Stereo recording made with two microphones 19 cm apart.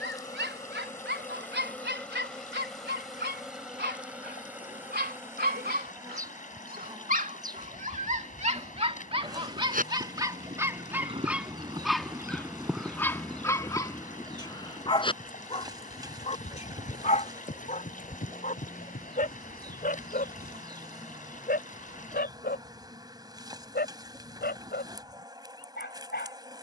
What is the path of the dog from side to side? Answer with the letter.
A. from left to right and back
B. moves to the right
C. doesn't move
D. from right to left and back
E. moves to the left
E.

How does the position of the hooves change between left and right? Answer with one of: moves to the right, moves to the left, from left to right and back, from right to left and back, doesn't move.
moves to the left.